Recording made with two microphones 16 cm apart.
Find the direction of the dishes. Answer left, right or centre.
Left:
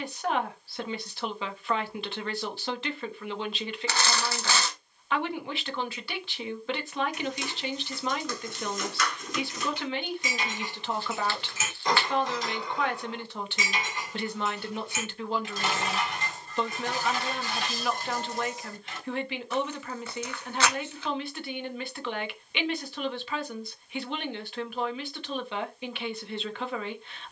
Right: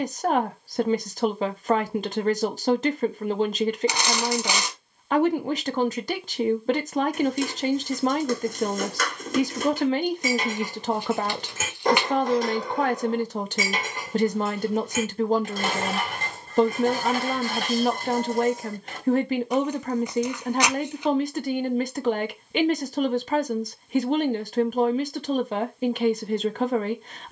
right.